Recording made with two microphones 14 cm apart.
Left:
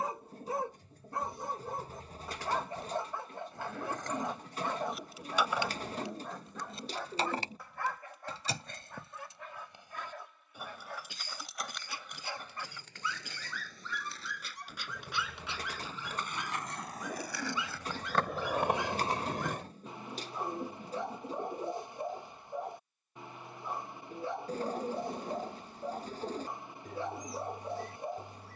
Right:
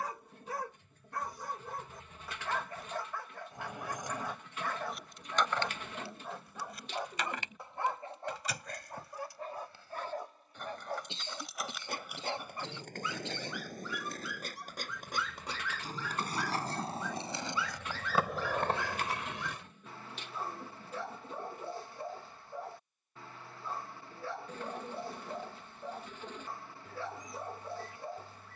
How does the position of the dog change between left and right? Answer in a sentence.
You can hear the dog go right and come back.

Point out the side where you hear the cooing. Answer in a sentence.
You can hear the cooing on the left.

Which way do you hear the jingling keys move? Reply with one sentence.
In this clip you hear the jingling keys go left and come back.